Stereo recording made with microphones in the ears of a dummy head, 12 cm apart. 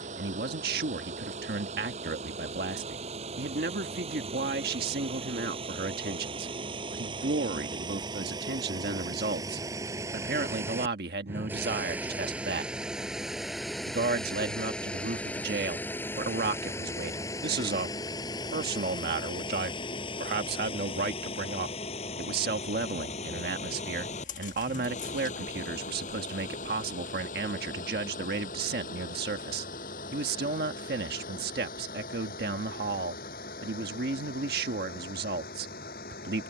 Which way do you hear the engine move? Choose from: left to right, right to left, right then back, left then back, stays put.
right to left.